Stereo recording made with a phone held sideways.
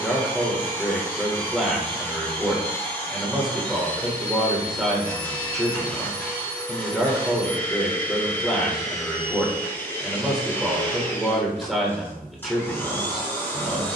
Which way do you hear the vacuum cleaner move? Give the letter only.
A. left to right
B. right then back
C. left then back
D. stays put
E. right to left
D.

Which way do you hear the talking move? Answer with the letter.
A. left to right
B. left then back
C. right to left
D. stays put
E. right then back
D.